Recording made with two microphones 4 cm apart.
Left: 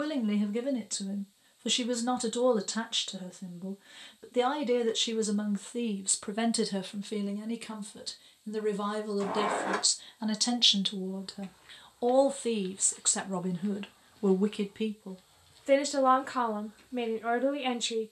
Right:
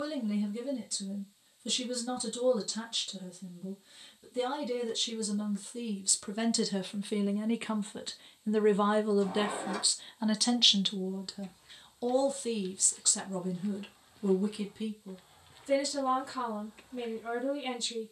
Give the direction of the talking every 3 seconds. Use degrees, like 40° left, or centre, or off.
50° left, 50° left, 10° right, 10° right, 40° left, 50° left.